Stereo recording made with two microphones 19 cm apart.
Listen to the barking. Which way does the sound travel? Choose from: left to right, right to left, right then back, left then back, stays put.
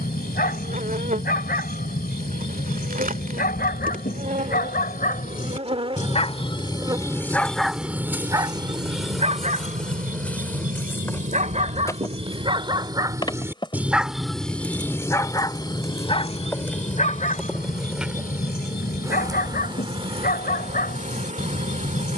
right then back.